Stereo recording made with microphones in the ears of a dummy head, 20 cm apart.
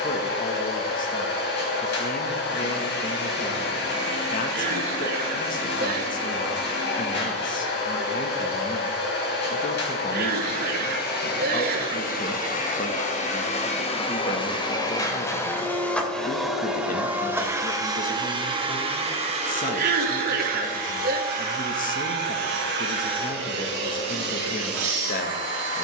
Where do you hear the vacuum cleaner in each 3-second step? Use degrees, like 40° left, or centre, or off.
50° left, 50° left, 50° left, 50° left, 30° left, centre, 30° right, 50° right, 60° right.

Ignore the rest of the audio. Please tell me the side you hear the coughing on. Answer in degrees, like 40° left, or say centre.
40° right.